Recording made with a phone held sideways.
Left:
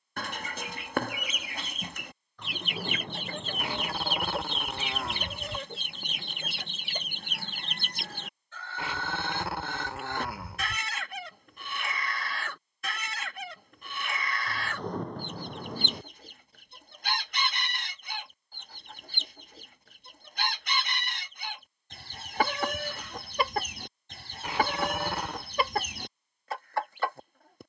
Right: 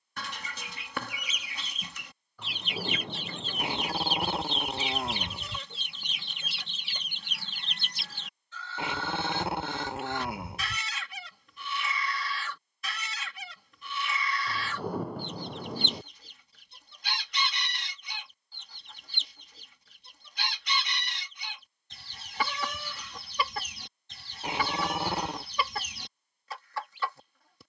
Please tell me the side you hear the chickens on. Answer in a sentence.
In this clip you hear the chickens on the left.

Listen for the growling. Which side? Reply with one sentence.
In this clip you hear the growling on the right.